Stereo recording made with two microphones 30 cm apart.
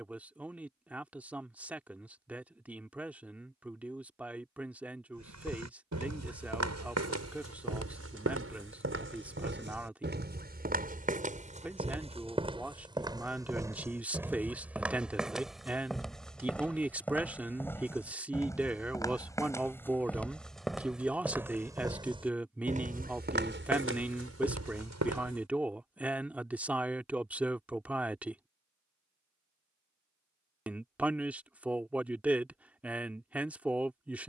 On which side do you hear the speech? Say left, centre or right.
centre.